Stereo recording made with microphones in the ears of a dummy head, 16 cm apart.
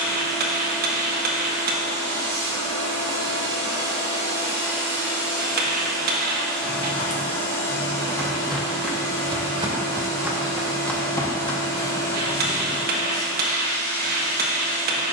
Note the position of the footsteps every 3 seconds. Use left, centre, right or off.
off, off, left, centre, left.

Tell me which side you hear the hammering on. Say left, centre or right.
right.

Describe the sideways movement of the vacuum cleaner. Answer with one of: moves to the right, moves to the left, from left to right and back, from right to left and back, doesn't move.
moves to the left.